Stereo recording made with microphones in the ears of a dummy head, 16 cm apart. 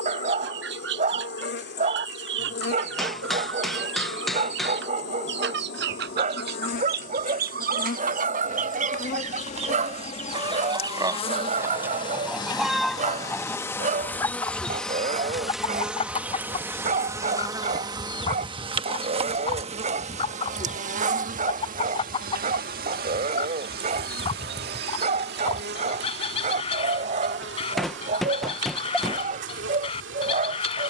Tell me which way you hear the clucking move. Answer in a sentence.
You can hear the clucking move to the left.